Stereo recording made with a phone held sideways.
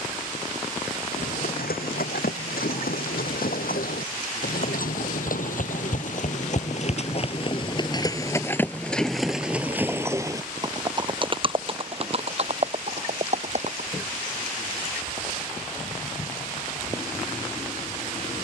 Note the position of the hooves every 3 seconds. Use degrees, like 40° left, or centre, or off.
80° left, 70° left, 30° left, 20° right, 50° right, off.